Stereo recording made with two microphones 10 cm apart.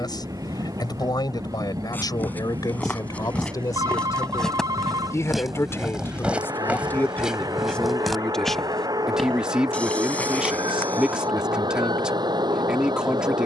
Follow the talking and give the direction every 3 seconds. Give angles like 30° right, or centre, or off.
40° left, 30° left, 10° left, 10° right, 10° right.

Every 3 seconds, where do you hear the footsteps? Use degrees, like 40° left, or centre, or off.
20° left, 10° left, centre, 10° left, off.